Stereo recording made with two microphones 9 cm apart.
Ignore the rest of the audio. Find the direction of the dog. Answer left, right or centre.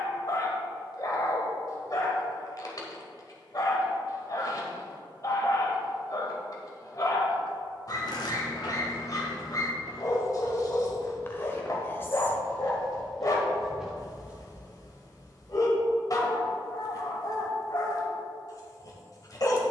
left.